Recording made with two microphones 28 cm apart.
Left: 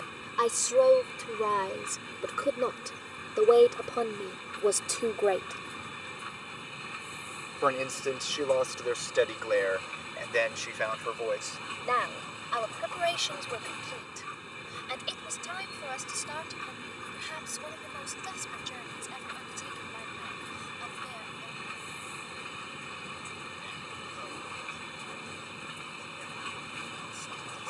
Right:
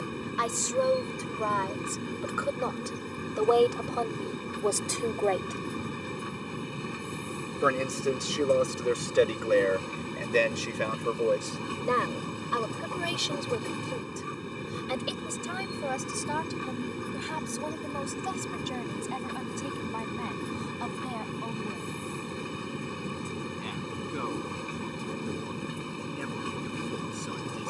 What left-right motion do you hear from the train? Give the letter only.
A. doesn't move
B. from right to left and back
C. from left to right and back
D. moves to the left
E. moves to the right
A.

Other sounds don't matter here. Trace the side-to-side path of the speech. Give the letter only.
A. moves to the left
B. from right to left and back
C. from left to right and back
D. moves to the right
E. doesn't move
D.